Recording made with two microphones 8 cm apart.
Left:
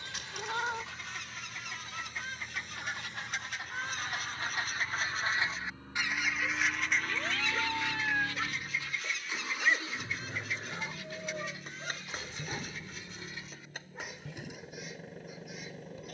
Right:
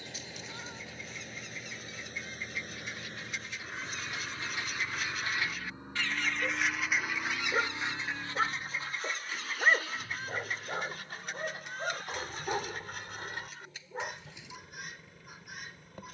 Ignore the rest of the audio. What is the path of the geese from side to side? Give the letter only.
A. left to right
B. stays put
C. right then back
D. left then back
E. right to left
A.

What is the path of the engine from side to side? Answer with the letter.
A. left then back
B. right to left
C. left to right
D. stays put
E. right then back
B.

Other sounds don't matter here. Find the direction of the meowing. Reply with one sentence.
You can hear the meowing on the left.